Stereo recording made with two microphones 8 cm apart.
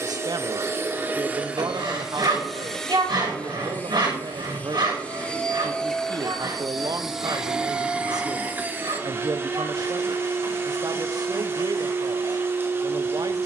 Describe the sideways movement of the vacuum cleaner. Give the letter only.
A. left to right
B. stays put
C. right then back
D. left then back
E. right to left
D.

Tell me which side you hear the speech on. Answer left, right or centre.
right.